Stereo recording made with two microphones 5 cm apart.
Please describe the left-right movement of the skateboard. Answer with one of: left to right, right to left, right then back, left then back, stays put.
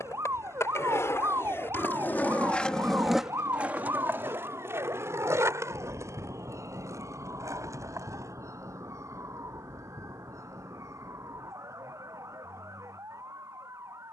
left to right.